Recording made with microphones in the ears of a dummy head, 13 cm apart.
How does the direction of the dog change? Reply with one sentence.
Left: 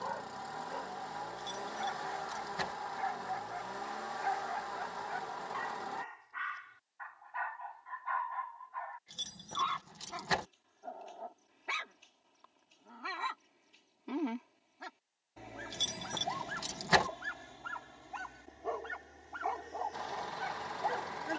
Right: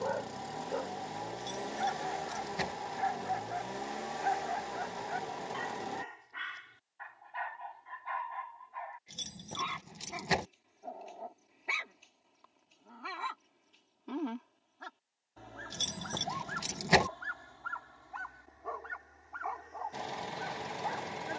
You can hear the dog move from right to left.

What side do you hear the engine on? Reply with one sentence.
In this clip you hear the engine on the right.